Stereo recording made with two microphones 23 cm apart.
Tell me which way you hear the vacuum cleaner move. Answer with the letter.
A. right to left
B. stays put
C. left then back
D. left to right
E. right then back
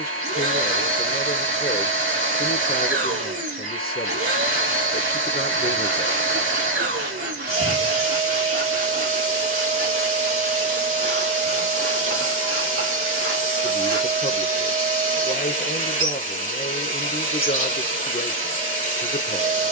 B.